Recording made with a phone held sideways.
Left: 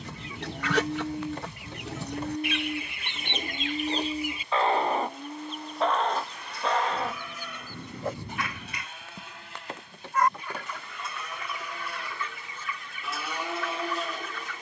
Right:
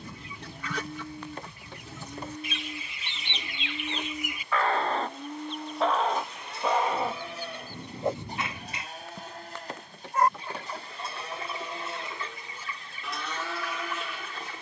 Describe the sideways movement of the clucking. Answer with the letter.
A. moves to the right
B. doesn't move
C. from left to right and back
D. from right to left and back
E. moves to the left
A.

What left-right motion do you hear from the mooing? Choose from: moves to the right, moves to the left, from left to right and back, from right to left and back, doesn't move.
from left to right and back.